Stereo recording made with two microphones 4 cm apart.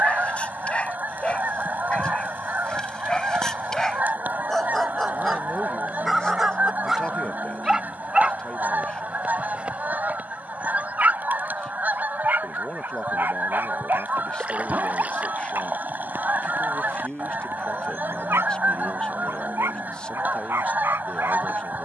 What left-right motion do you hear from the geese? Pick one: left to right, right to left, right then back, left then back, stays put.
stays put.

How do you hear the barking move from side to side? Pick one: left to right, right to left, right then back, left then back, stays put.
left to right.